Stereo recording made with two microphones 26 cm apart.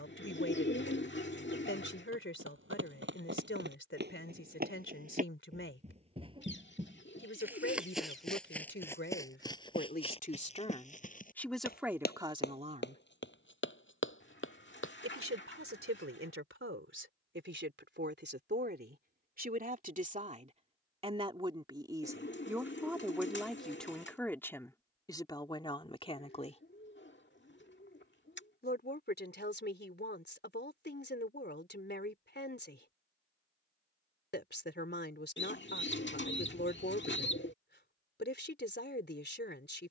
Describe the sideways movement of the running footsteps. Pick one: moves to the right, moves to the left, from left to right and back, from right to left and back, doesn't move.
moves to the left.